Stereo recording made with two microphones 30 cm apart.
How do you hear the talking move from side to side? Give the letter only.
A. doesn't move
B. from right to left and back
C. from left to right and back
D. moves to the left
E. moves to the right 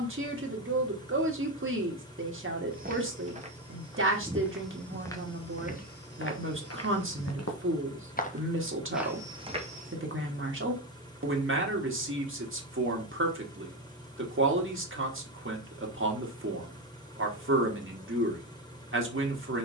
A.